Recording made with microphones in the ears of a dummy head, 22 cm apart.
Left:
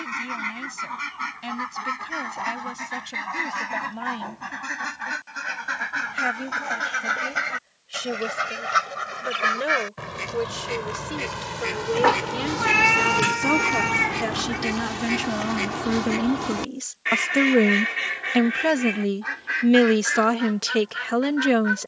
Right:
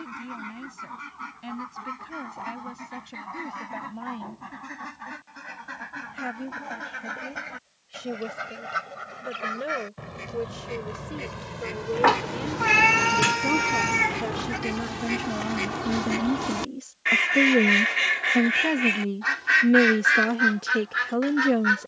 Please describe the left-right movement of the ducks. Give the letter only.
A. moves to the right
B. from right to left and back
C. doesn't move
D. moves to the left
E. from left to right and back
A.